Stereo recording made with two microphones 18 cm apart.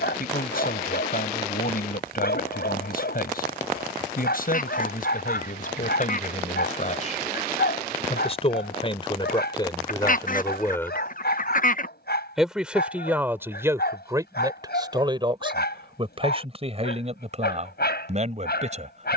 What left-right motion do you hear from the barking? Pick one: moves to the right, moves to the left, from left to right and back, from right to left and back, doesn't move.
doesn't move.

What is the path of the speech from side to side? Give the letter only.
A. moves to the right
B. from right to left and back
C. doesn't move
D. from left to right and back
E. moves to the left
A.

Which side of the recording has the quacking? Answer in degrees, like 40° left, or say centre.
50° left.